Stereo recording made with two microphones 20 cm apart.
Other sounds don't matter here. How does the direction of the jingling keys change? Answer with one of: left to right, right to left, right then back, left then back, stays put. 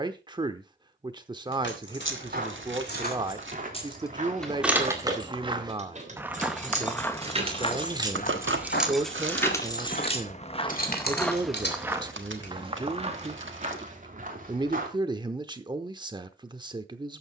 right then back.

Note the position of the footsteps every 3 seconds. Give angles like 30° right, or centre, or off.
50° right, 40° right, 30° left, 30° left, 40° right, off.